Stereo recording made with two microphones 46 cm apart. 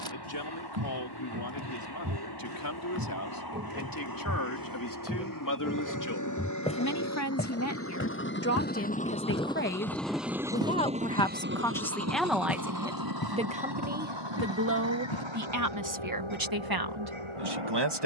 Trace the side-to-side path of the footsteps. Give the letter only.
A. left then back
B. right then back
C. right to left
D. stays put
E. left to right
C.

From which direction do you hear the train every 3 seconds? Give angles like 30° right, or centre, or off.
60° left, 50° left, 30° left, 10° right, 50° right, 70° right.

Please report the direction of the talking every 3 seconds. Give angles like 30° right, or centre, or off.
50° left, 40° left, 30° left, 20° left, 10° right, 50° right.